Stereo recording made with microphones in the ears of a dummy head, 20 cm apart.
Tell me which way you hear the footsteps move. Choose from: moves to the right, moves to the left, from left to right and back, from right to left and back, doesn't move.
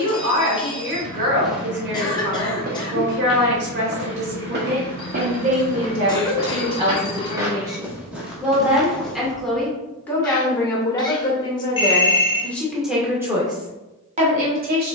from left to right and back.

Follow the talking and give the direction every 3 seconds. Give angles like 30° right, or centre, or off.
50° right, 40° right, 20° right, 10° left, 20° right.